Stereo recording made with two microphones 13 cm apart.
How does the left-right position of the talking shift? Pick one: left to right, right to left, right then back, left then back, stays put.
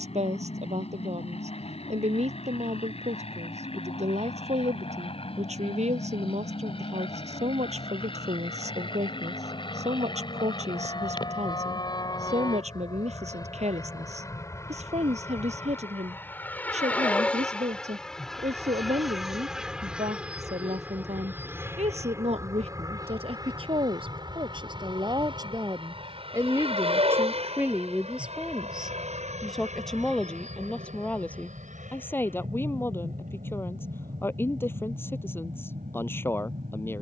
right to left.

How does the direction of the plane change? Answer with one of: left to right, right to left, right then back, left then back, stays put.
left to right.